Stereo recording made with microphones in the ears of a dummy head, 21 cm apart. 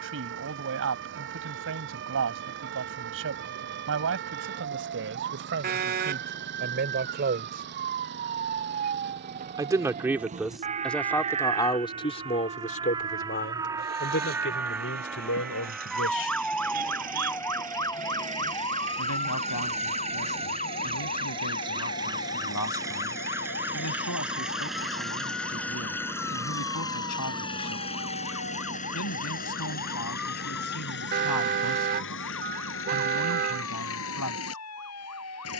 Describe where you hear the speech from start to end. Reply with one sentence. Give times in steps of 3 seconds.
In this clip you hear the speech on the right from 0 s, in the centre from 9 s and on the left from 12 s.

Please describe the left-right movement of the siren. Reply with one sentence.
You can hear the siren move to the left.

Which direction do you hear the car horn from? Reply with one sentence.
In this clip you hear the car horn on the right.